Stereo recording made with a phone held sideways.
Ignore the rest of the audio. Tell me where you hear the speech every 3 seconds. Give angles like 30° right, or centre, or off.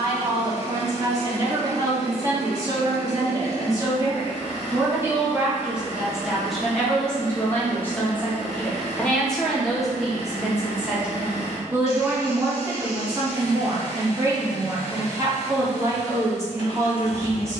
30° right, 20° right, 10° left, centre, 20° right, 20° right.